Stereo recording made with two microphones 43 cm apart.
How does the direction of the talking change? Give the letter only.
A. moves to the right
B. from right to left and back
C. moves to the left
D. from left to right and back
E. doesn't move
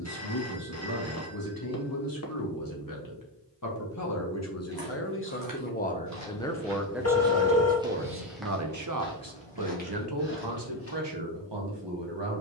A.